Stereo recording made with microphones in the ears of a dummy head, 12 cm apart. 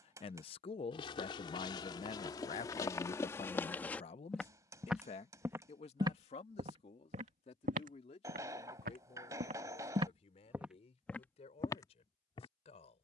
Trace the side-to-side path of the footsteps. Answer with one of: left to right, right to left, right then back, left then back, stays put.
right then back.